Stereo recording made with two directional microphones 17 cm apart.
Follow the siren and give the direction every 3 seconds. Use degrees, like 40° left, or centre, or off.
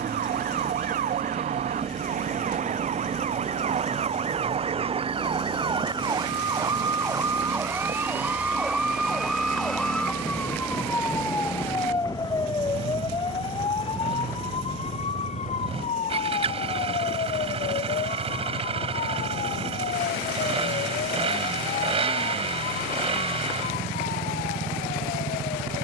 50° right, 40° right, 20° right, 10° left, 30° left, 40° left, 50° left, 60° left, 60° left.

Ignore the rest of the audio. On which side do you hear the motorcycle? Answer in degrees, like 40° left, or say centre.
30° right.